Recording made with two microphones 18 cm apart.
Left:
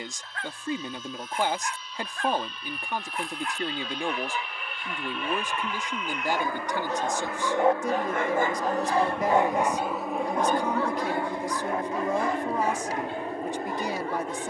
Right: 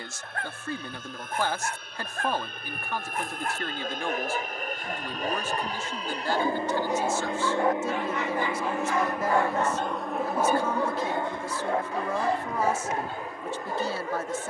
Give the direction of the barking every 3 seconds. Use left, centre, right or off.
right, right, centre, centre, right.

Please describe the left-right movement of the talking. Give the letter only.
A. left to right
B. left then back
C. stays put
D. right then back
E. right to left
C.